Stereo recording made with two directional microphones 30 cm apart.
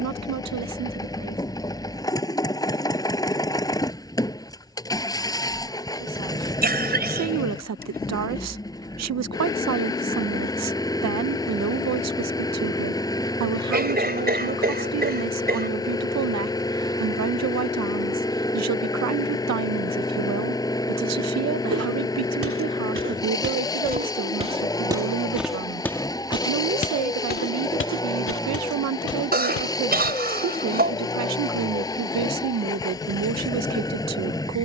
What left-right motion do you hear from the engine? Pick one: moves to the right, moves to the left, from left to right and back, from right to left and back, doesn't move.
doesn't move.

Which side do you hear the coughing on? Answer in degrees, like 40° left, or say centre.
30° right.